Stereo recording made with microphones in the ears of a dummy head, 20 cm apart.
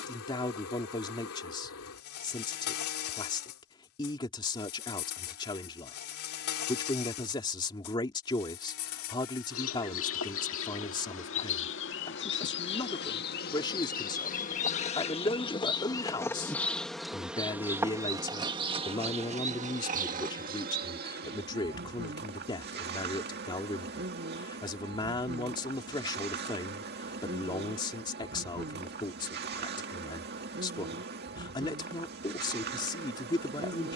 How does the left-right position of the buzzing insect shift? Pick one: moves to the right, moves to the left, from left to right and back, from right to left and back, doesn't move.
moves to the right.